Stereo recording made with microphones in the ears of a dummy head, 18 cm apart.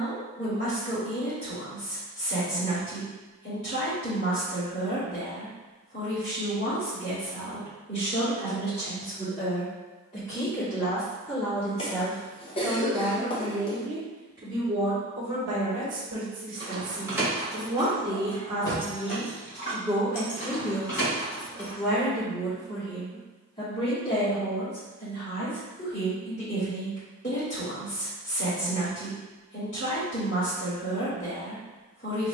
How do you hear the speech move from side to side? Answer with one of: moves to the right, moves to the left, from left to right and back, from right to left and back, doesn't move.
from left to right and back.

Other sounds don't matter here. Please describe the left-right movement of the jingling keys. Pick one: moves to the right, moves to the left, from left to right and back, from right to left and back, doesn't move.
moves to the left.